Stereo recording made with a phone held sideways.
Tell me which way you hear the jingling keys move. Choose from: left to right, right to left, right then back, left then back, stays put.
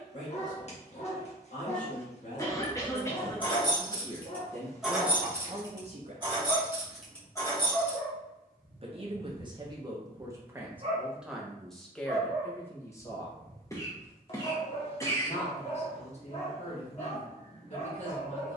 right then back.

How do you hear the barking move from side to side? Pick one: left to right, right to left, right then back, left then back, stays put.
right then back.